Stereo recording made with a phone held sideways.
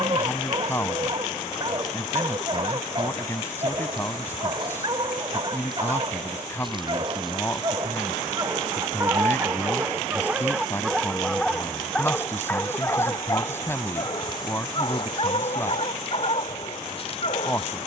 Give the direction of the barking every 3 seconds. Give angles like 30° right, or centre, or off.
30° right, 30° right, 30° right, 10° right, 30° left, 50° left.